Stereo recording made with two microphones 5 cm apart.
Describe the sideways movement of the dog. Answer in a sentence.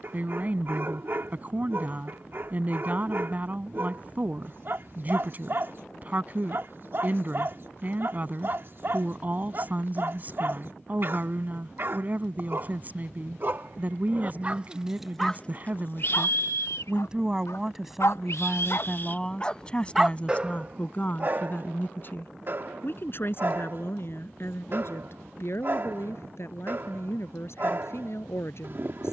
You can hear the dog move from right to left and back again.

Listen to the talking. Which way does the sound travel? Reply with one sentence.
In this clip you hear the talking travel towards the left.